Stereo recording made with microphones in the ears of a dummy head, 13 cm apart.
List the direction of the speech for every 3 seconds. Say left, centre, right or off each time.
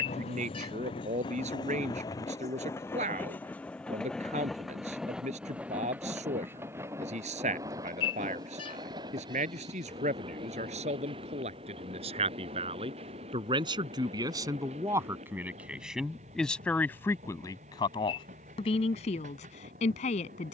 right, right, right, right, right, centre, left.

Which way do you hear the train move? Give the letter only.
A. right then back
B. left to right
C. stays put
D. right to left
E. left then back
B.